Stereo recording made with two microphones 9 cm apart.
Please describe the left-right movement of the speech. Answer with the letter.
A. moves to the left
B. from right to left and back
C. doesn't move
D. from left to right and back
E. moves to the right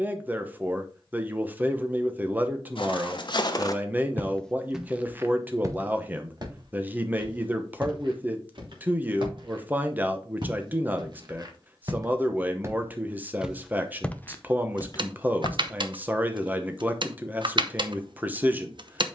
C.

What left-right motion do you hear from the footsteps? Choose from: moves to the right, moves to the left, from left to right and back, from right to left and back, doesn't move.
from left to right and back.